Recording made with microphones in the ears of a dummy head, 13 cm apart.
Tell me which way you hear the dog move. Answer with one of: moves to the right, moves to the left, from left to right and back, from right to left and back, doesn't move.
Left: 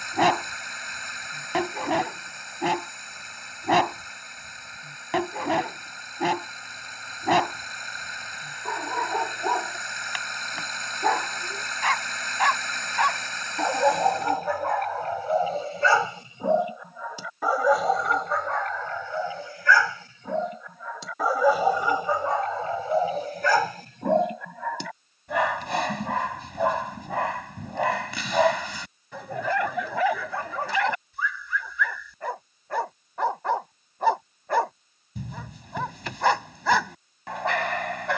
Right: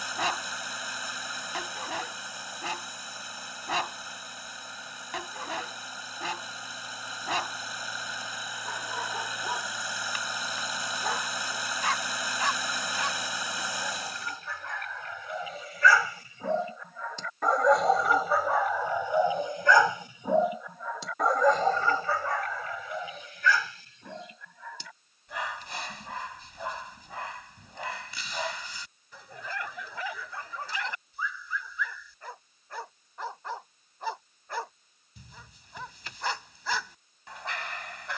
from left to right and back.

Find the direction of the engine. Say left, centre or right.
centre.